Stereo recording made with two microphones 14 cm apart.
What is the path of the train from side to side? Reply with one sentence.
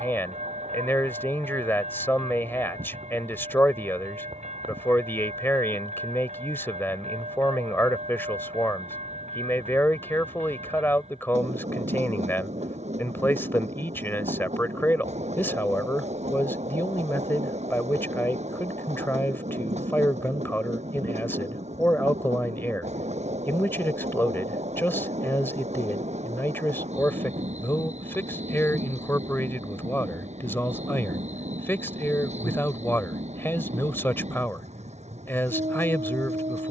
You can hear the train stay in one place.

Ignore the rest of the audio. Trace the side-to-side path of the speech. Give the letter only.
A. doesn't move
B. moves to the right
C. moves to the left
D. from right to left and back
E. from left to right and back
A.